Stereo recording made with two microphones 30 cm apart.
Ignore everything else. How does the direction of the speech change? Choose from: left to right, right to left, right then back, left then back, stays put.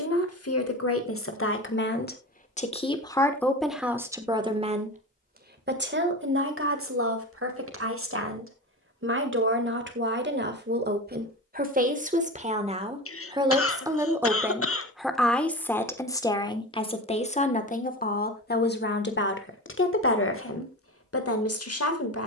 right then back.